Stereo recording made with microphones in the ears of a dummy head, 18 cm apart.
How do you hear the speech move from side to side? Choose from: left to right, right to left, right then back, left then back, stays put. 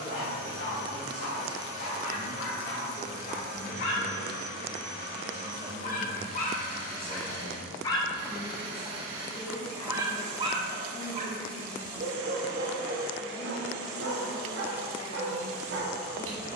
right to left.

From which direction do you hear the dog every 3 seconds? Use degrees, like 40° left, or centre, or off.
60° left, 50° left, 30° left, 30° right, 60° right, 70° right.